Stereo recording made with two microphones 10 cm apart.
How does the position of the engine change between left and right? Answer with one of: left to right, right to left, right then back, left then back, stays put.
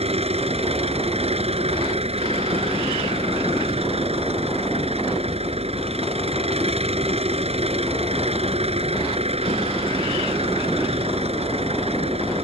stays put.